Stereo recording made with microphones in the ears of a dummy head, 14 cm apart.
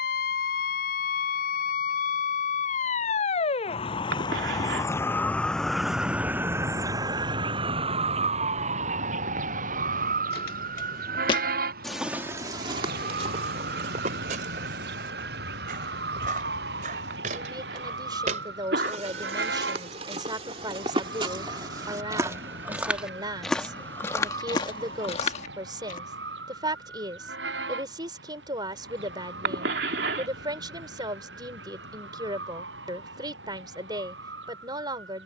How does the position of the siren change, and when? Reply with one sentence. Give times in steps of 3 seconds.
In this clip you hear the siren on the left from 0 s and on the right from 6 s.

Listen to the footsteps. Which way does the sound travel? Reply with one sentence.
In this clip you hear the footsteps move from left to right and back again.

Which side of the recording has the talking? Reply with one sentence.
You can hear the talking on the right.